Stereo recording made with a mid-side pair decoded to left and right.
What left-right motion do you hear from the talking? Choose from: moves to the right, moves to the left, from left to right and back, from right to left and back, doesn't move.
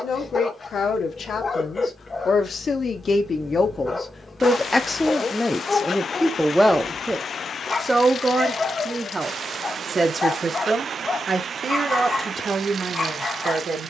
moves to the right.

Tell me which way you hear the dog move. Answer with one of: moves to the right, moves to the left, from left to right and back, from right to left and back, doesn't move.
doesn't move.